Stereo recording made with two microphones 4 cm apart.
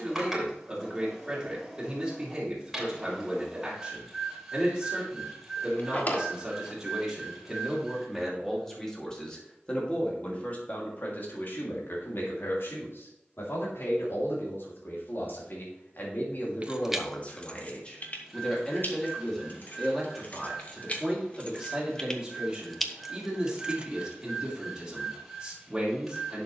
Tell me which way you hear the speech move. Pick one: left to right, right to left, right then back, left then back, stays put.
left then back.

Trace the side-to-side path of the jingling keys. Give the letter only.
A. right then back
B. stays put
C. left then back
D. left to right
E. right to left
C.